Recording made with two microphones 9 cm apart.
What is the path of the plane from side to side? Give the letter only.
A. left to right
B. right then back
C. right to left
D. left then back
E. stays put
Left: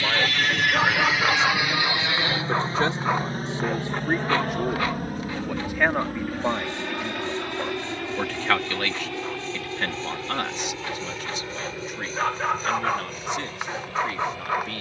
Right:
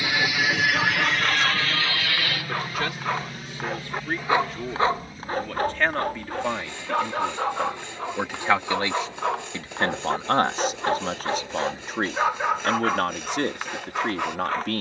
C.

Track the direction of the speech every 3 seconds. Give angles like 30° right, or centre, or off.
30° left, 20° left, centre, 40° right, 60° right.